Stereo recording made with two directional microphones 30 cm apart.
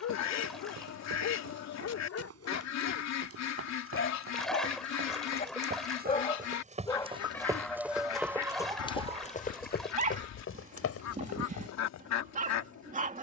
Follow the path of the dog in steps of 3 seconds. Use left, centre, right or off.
left, left, centre, right, right.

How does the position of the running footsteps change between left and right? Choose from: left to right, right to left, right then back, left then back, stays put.
right to left.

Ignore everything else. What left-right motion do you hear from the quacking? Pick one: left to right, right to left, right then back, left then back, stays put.
stays put.